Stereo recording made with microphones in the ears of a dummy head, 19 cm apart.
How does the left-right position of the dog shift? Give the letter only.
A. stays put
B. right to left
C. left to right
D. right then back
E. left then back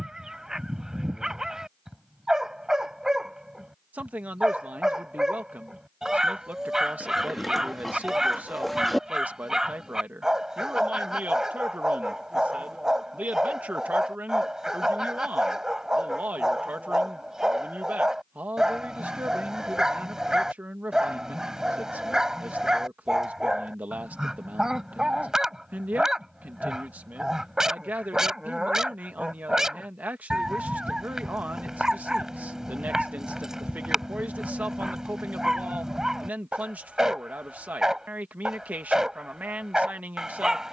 A.